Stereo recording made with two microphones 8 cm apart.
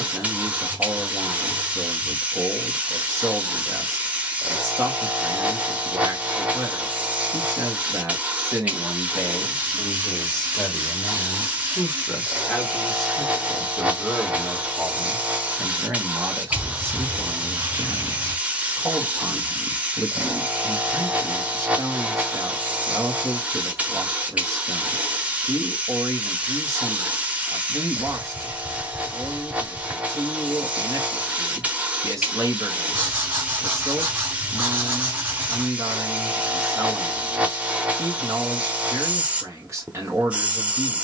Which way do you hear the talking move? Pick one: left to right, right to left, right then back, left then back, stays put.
left then back.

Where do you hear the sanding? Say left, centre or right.
right.